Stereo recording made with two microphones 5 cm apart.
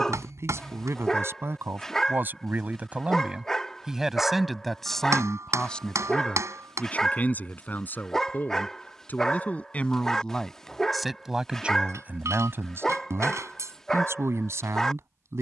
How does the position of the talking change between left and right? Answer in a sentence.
In this clip you hear the talking go left and come back.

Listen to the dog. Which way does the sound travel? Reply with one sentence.
In this clip you hear the dog stay put.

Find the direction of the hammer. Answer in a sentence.
You can hear the hammer on the right.